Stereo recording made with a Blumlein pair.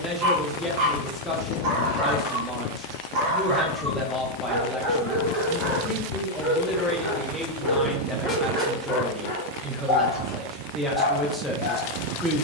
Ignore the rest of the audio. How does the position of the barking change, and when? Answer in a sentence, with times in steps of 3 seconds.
In this clip you hear the barking on the right from 0 s, in the centre from 6 s and on the left from 9 s.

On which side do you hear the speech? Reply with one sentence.
You can hear the speech in the centre.